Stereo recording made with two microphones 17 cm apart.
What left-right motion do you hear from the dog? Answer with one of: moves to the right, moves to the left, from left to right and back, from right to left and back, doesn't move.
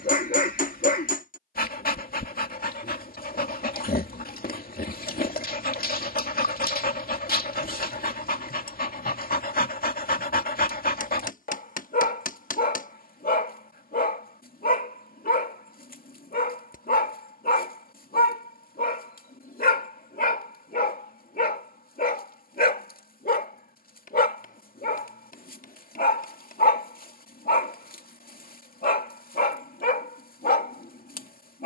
doesn't move.